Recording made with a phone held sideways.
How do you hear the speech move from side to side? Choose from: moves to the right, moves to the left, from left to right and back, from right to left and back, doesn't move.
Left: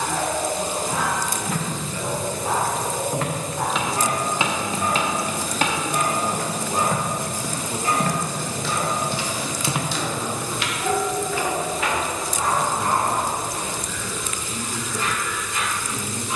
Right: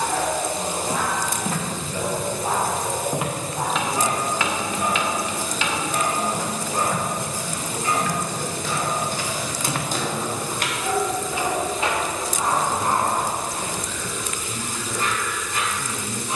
from right to left and back.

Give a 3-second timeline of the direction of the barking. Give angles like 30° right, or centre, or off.
40° right, 10° right, 20° left, 20° left, 30° right, 40° right.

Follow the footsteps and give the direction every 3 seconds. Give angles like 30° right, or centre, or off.
40° right, 20° left, 50° left, 10° right, 40° right, off.